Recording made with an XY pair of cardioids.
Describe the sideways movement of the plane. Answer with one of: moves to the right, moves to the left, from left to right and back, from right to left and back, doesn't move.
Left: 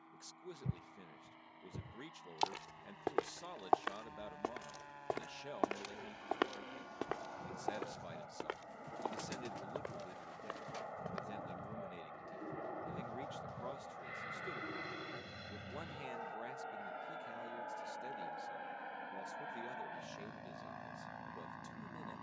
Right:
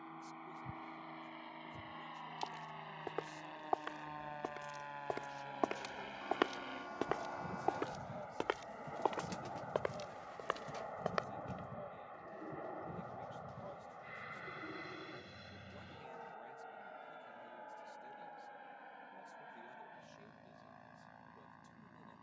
moves to the left.